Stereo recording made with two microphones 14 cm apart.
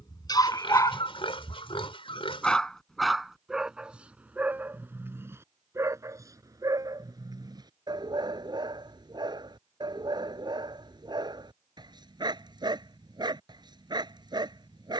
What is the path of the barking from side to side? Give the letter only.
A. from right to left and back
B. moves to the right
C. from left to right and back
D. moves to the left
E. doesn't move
B.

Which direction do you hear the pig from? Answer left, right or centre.
left.